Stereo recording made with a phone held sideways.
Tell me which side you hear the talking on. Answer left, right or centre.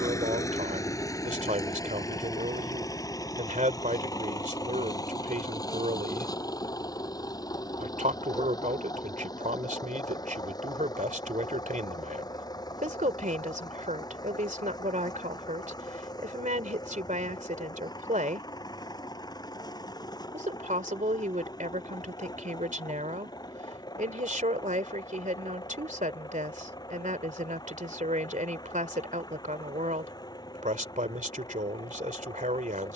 right.